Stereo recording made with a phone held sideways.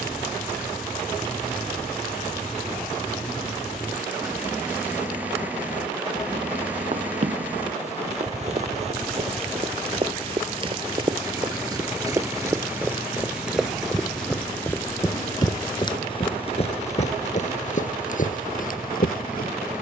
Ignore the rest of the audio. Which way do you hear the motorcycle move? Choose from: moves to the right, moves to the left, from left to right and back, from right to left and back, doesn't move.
doesn't move.